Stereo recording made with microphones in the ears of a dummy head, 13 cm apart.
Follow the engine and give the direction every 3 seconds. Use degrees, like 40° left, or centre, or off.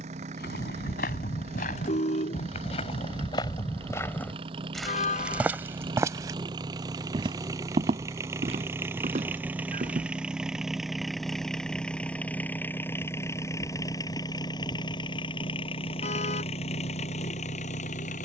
40° right, 40° right, 20° right, centre, 20° left, 40° left.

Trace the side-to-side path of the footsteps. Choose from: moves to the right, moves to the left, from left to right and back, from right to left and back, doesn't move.
moves to the right.